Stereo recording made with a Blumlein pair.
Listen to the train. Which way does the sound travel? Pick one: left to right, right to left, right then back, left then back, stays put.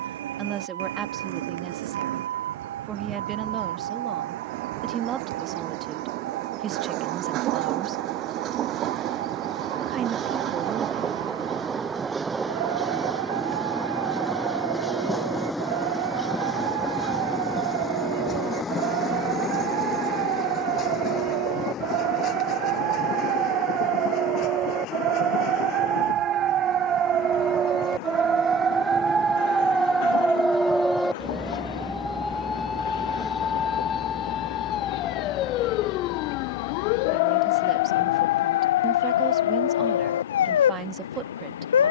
right to left.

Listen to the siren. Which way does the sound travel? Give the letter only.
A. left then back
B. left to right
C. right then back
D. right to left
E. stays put
D.